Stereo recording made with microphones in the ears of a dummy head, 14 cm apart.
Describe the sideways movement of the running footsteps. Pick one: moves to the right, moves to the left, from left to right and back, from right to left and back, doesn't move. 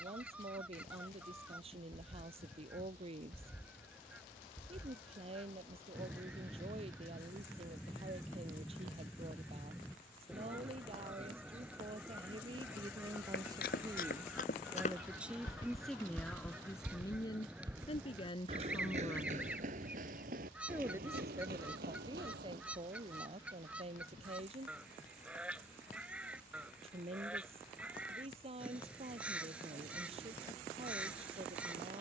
moves to the right.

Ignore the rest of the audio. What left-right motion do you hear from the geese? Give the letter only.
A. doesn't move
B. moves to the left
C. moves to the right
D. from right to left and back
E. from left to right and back
A.